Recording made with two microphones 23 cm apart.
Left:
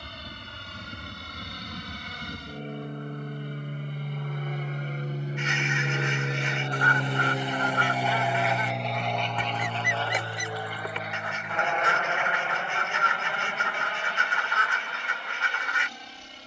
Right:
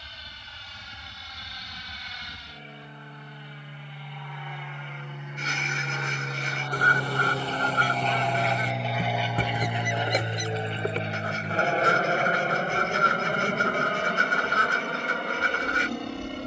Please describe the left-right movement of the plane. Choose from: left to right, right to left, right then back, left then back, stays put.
left to right.